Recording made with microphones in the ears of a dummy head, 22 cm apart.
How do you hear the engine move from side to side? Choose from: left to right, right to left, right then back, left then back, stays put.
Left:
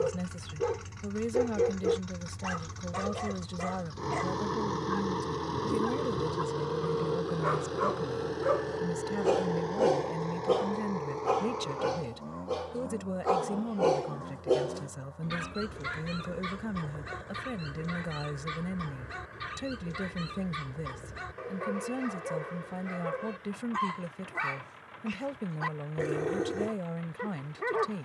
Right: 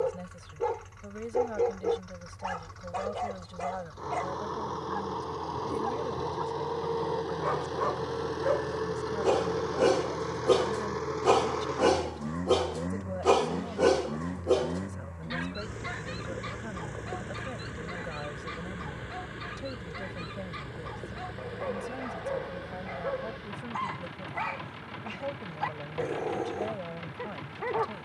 left to right.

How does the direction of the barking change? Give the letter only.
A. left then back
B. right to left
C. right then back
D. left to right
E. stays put
C.